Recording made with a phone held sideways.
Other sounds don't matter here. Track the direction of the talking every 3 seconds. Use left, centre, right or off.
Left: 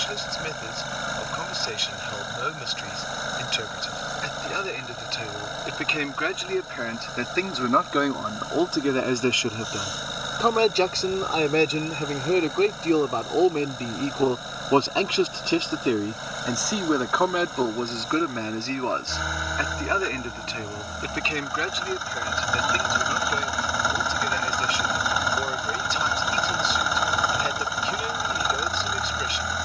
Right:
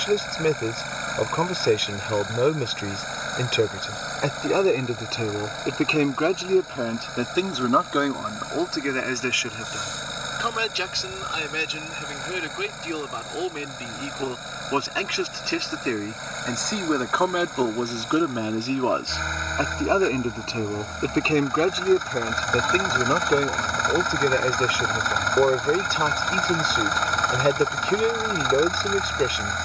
right, right, centre, left, left, centre, right, right, right, right.